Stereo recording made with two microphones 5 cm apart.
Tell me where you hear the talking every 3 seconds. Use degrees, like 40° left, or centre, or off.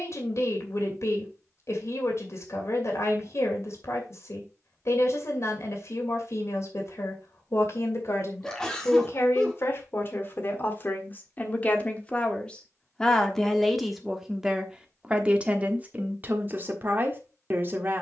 60° left, 60° left, 60° left, 40° left, centre, 30° right.